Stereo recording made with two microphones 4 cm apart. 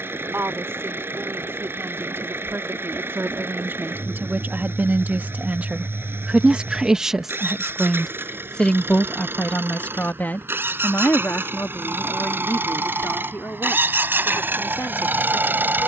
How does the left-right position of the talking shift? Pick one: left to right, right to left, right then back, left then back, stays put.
right to left.